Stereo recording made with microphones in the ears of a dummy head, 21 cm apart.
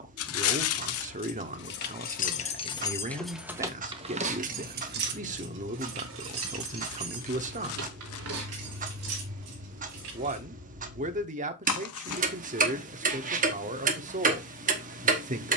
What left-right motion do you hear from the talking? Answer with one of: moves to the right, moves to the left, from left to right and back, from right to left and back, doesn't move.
doesn't move.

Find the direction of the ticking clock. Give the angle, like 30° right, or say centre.
40° right.